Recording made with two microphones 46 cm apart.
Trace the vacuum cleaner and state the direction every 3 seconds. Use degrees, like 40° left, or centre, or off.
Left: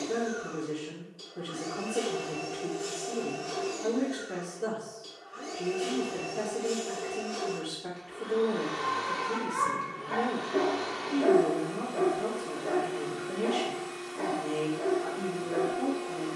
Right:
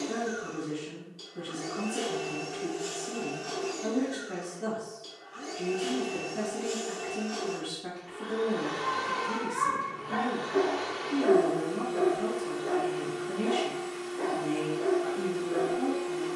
20° right, 20° right, 10° right, 50° left, 20° left, 20° right.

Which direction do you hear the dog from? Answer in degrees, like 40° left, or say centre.
70° left.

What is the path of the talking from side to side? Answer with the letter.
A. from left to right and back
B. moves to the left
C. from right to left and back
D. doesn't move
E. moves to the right
D.